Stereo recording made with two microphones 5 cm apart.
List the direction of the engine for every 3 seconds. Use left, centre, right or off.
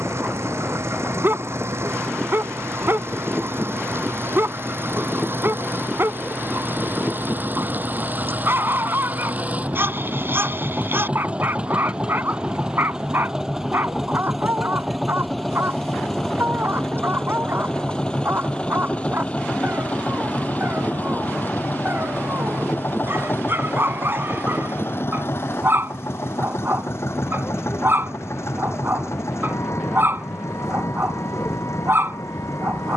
right, right, right, right, centre, centre, left, left, left, left, left.